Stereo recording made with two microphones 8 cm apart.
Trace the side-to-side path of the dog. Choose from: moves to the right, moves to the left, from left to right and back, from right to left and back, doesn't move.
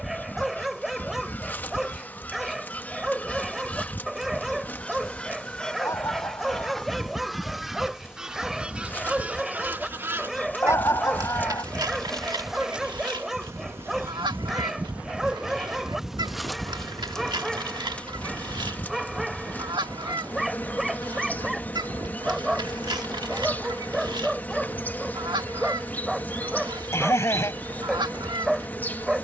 doesn't move.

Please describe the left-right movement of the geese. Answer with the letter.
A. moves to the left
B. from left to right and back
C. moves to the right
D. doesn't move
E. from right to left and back
C.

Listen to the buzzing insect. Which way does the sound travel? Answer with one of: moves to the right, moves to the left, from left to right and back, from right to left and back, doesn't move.
from left to right and back.